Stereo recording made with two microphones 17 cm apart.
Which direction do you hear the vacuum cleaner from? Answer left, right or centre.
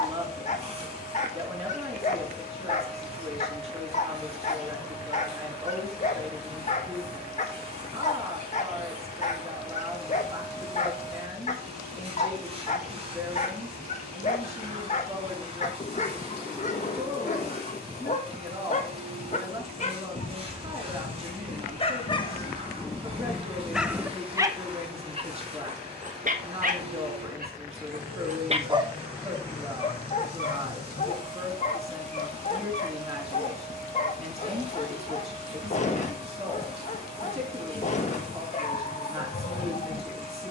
right.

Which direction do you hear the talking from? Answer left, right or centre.
right.